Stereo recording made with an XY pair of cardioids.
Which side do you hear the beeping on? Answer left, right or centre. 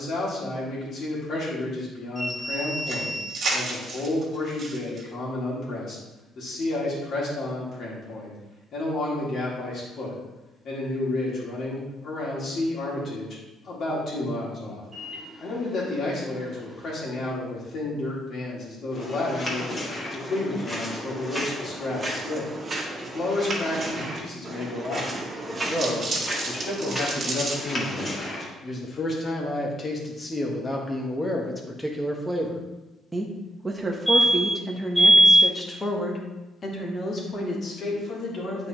centre.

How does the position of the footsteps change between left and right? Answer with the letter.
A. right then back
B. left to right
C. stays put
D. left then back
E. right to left
A.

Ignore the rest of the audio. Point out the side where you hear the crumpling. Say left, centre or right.
right.